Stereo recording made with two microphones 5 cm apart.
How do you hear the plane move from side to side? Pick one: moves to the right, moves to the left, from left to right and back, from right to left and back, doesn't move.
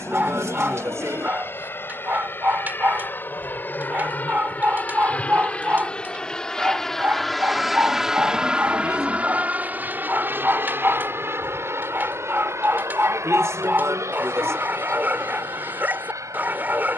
moves to the right.